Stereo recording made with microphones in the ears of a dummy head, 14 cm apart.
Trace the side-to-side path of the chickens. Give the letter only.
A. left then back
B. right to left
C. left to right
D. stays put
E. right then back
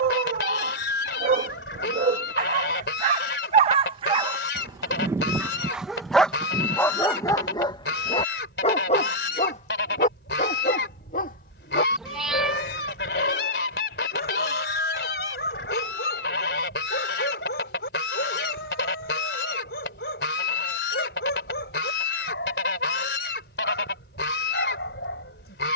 D.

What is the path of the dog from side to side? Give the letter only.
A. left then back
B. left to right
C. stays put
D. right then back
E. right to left
E.